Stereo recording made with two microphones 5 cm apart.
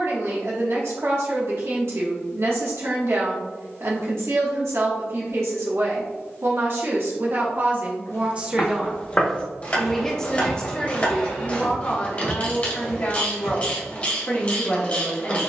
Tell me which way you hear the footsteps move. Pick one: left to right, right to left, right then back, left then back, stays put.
left to right.